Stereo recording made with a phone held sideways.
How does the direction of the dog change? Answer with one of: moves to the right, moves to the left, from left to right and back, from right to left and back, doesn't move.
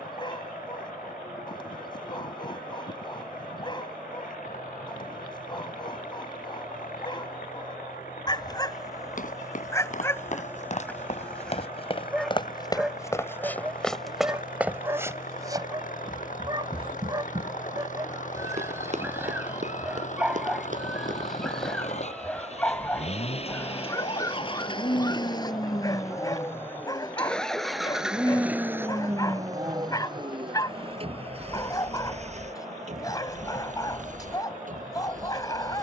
from left to right and back.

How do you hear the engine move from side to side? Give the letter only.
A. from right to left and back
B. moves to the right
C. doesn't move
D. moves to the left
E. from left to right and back
B.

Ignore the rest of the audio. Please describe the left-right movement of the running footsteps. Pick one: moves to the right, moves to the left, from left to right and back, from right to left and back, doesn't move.
moves to the right.